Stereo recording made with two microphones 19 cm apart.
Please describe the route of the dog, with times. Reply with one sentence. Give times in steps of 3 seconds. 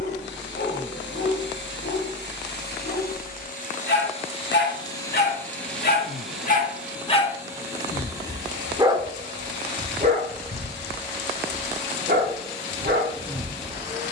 You can hear the dog on the left from 0 s, in the centre from 6 s and on the right from 9 s.